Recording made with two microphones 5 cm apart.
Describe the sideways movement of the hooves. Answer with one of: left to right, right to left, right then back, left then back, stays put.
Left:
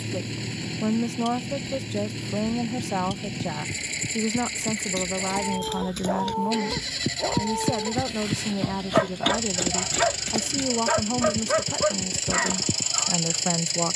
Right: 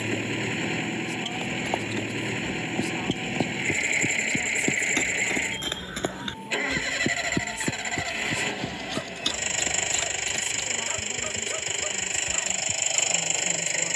right to left.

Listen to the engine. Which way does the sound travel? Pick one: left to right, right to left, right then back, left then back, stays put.
stays put.